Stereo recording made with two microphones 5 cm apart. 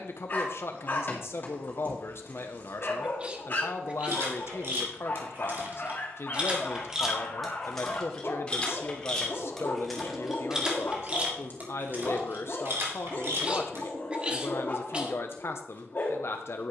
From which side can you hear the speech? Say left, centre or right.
left.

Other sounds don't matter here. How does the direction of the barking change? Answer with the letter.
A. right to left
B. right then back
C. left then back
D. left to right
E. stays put
E.